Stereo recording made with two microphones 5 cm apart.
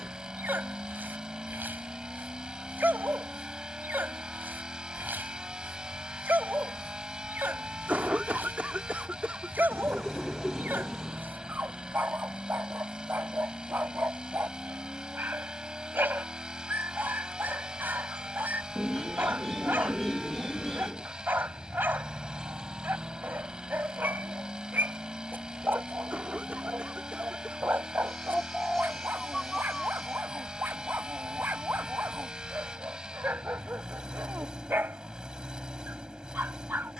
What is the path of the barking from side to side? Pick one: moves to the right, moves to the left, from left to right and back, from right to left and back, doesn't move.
doesn't move.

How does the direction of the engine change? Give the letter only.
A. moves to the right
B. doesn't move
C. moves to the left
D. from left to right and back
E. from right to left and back
B.